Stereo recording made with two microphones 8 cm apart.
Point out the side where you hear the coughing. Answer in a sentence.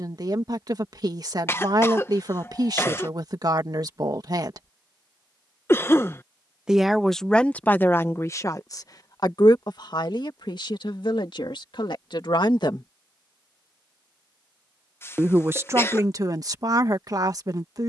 You can hear the coughing on the left.